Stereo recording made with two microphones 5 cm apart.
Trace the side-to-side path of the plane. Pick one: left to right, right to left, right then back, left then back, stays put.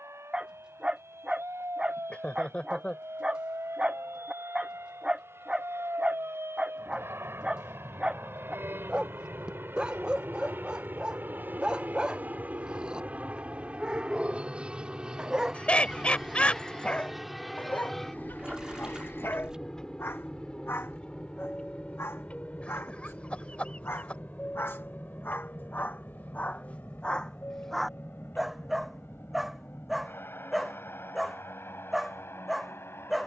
right to left.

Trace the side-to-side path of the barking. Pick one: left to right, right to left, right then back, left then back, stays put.
left then back.